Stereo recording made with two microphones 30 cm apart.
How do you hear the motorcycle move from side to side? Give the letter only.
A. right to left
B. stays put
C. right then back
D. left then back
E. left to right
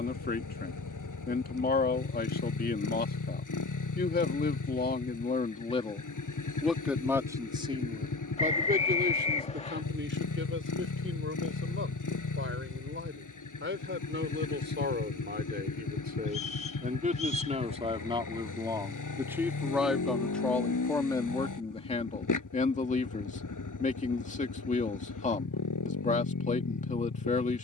B.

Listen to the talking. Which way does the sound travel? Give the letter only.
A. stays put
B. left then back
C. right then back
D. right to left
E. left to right
C.